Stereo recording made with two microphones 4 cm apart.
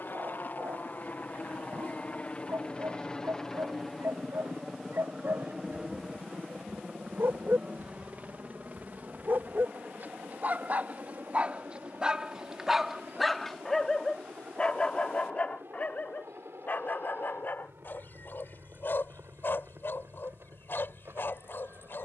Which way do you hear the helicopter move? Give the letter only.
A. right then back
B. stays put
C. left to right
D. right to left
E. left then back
C.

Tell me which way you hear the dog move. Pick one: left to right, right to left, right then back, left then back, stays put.
right to left.